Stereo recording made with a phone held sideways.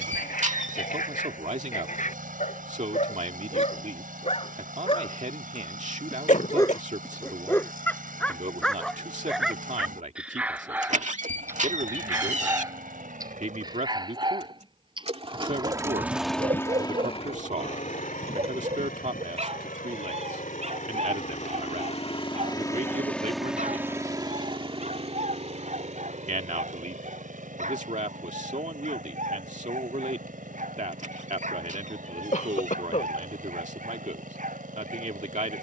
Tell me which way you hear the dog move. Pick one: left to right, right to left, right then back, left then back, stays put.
left to right.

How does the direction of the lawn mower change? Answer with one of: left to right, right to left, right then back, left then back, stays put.
left then back.